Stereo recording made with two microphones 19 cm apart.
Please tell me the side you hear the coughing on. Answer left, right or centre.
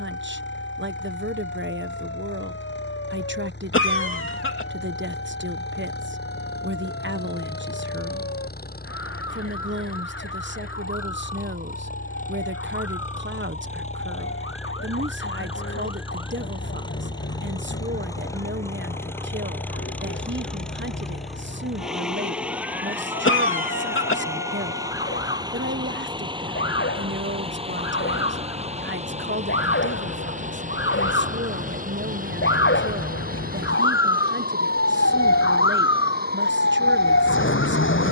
left.